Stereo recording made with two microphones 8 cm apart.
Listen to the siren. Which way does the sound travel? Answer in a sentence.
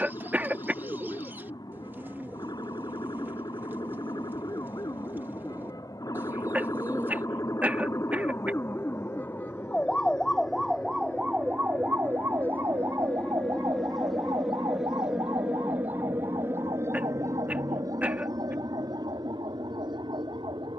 In this clip you hear the siren go from the left side to the right.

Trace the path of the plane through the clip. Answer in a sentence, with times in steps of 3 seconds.
You can hear the plane on the left from 0 s, in the centre from 12 s and on the right from 15 s.